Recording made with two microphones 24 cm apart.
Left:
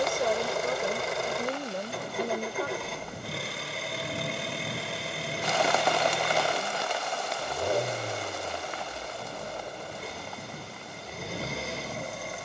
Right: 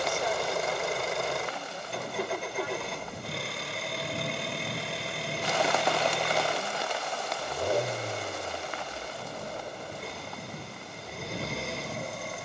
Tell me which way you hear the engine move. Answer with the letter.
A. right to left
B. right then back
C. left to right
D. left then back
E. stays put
E.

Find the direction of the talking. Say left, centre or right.
left.